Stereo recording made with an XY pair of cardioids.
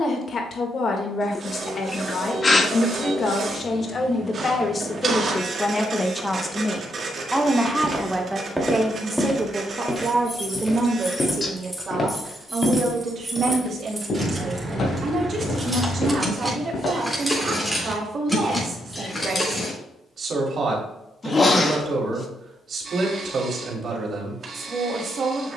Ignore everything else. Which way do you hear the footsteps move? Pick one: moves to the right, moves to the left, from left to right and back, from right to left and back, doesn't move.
moves to the left.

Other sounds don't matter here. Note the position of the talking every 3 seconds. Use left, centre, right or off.
left, left, centre, right, right, right, right, right, right.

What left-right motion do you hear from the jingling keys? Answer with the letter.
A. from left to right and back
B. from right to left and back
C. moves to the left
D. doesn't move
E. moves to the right
A.